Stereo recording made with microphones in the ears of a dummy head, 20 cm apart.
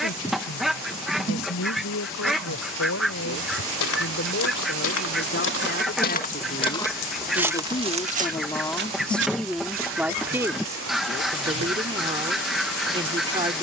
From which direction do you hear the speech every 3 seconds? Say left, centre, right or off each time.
left, left, left, centre, right.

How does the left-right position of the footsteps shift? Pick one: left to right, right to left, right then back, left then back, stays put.
left to right.